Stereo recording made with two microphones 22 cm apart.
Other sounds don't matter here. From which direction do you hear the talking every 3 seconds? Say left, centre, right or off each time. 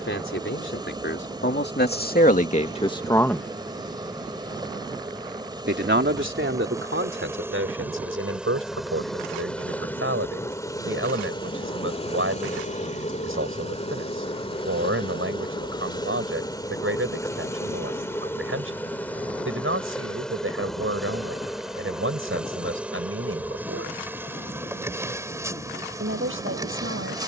left, right, right, right, right, right, right, right, right.